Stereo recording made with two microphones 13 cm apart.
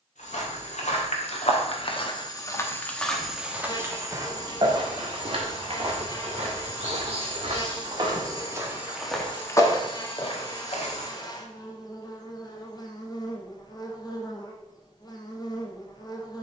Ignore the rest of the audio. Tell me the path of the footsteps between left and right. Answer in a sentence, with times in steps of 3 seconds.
You can hear the footsteps on the left from 0 s, on the right from 3 s, on the left from 9 s and not at all from 12 s.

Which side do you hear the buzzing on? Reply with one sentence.
You can hear the buzzing on the left.